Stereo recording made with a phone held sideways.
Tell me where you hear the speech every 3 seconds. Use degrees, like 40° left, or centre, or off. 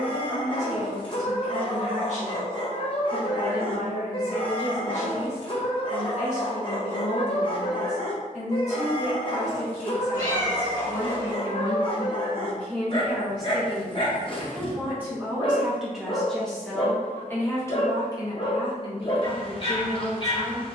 50° left, 50° left, 50° left, 40° left, centre, centre, 40° left.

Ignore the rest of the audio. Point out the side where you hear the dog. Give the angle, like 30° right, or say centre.
40° left.